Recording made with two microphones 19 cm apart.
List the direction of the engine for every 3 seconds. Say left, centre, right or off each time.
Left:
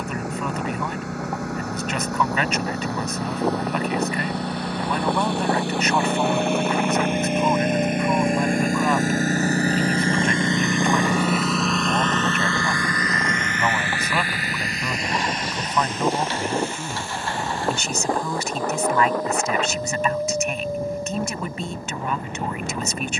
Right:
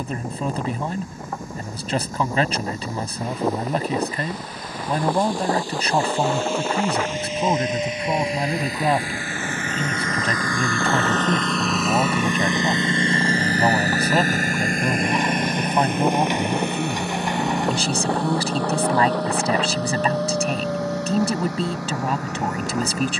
left, left, left, left, right, right, right, right.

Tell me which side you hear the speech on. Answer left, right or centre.
right.